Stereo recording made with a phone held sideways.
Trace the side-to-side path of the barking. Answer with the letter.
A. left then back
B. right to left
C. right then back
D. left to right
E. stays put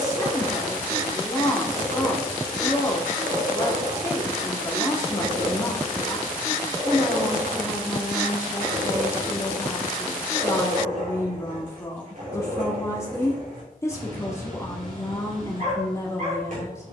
E.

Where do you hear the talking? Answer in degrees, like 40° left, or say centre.
20° left.